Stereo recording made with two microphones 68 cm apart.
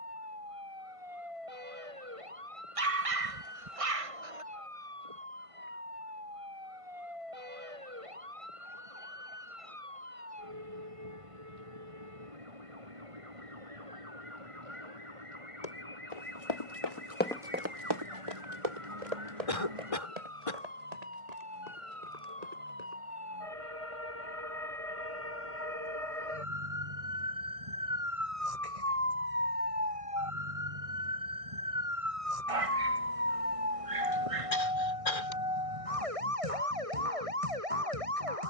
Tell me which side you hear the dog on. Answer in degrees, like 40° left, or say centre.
60° right.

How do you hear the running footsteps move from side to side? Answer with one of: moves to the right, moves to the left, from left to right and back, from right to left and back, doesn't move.
moves to the right.